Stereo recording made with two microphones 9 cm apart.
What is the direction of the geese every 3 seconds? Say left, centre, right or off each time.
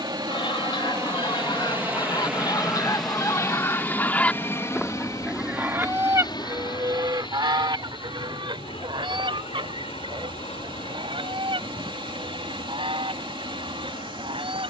left, centre, right, right, right.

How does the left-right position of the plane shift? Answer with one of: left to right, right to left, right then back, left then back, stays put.
right to left.